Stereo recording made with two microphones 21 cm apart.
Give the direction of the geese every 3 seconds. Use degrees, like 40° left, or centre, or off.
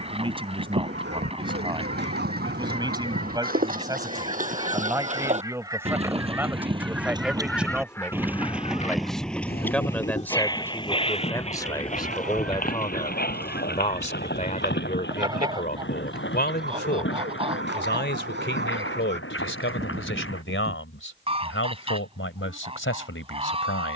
30° right, 20° right, 10° left, 30° left, 10° right, 20° right, 30° right, 30° right.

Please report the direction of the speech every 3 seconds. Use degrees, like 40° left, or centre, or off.
20° right, 20° right, 10° right, 10° left, 30° left, 50° left, 70° left, 80° left.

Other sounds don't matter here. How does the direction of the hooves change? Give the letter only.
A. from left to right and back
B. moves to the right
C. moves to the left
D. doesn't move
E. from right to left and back
C.